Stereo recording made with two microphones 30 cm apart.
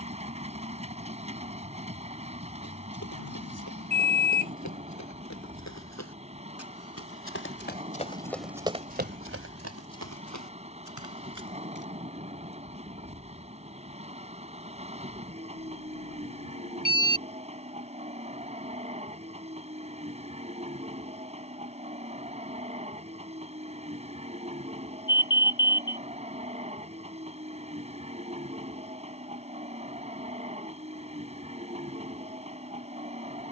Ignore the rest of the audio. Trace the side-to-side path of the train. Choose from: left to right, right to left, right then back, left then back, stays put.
stays put.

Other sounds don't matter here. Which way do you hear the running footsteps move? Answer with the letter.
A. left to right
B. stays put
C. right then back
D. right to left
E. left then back
A.